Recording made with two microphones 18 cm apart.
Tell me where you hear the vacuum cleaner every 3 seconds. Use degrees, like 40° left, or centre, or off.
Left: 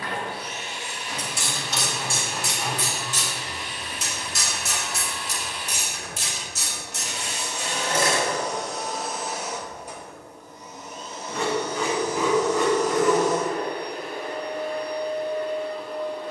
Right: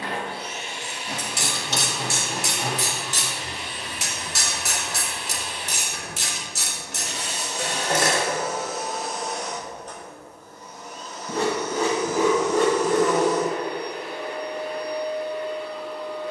30° right, 30° right, 20° right, 20° left, 40° left, 50° left.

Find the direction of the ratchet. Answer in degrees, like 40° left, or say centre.
80° right.